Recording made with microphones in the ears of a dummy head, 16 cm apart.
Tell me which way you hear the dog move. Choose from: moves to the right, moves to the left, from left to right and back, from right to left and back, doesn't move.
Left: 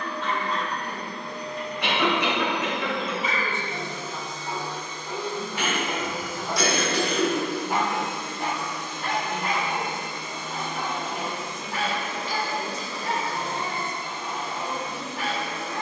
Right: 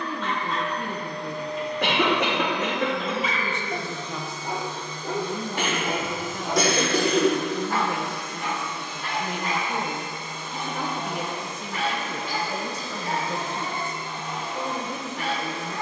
moves to the left.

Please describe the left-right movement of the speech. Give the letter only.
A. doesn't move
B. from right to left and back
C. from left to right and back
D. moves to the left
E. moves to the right
A.